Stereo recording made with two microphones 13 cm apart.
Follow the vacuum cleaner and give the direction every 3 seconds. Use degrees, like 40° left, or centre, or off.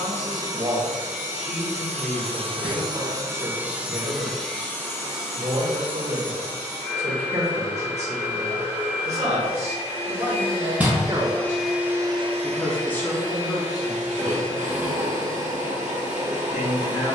60° right, 10° left, 40° left, 30° left, 60° right, 70° right.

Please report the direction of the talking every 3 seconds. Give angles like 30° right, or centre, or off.
50° right, 50° right, 50° right, 40° right, 30° left, 50° left.